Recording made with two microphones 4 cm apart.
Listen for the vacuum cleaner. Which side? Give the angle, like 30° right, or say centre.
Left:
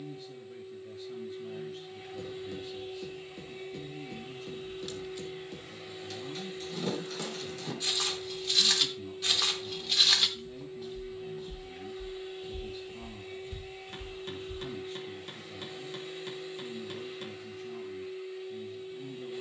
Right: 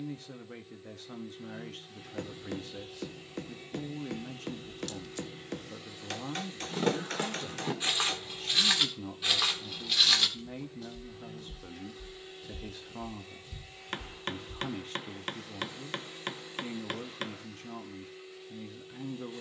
10° left.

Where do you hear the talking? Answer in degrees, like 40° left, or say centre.
70° right.